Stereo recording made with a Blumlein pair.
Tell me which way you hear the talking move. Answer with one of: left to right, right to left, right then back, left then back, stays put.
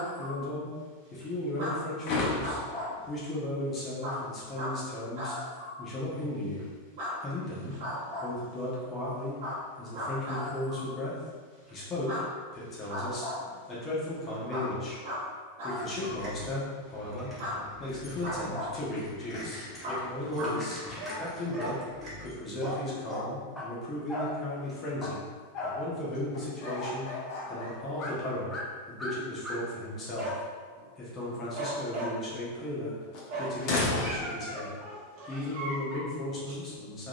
stays put.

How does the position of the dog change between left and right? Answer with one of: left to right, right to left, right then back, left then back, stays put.
left then back.